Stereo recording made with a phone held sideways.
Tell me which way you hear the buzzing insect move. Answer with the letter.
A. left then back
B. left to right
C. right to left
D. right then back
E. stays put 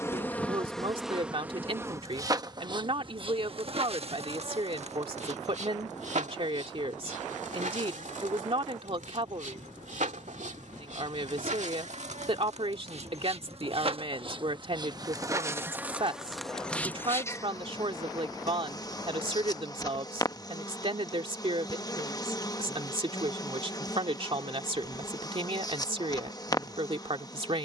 D.